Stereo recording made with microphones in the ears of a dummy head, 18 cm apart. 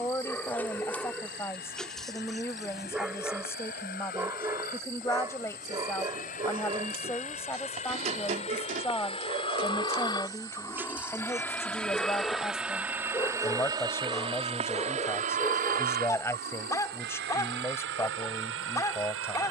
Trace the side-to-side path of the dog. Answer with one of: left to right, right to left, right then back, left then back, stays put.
right then back.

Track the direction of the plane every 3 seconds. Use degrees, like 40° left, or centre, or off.
60° left, 50° left, 40° left, 20° left, 20° right, 50° right, 70° right.